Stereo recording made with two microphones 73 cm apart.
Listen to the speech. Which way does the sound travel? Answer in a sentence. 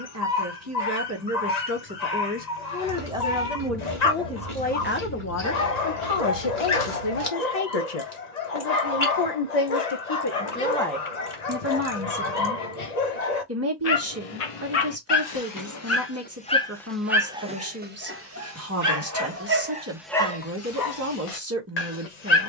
In this clip you hear the speech go left and come back.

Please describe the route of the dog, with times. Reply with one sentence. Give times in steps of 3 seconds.
In this clip you hear the dog on the left from 0 s, in the centre from 15 s and on the left from 21 s.